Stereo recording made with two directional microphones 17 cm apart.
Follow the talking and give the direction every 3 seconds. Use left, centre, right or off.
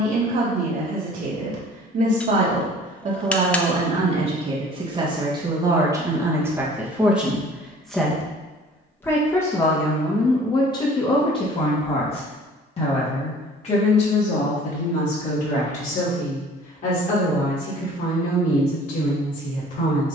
right, right, centre, left, left, left, left.